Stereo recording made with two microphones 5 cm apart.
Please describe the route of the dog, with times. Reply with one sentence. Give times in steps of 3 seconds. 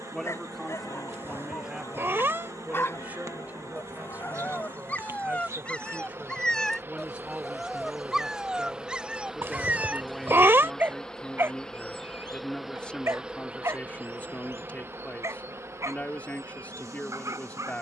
In this clip you hear the dog on the left from 0 s, in the centre from 6 s and on the right from 9 s.